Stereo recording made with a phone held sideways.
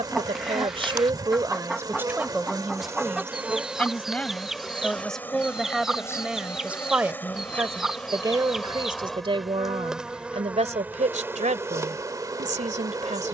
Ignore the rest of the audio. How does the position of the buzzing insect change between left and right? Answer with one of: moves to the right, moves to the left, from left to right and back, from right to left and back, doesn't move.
from right to left and back.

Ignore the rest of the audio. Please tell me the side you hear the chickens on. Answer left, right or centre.
centre.